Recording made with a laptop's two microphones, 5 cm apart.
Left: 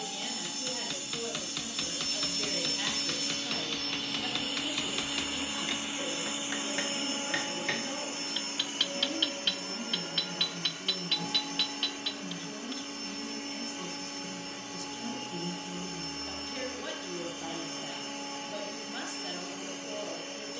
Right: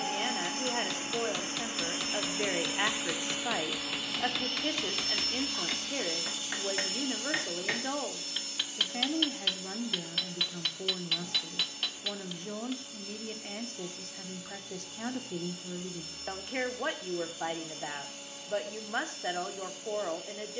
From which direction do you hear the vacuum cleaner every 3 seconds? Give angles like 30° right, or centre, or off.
30° right, centre, 40° left, 50° left, 50° left, 50° left, 50° left.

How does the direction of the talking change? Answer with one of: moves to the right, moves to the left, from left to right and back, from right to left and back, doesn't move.
doesn't move.